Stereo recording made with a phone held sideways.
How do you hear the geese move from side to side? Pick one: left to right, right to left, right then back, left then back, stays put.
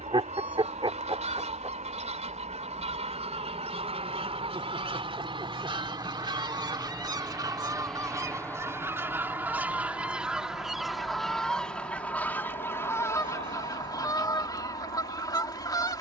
right to left.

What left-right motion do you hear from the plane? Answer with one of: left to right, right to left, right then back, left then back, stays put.
right to left.